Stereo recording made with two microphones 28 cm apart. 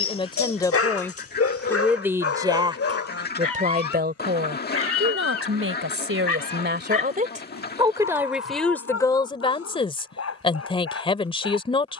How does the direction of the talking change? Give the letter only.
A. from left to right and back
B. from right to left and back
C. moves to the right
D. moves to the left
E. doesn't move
A.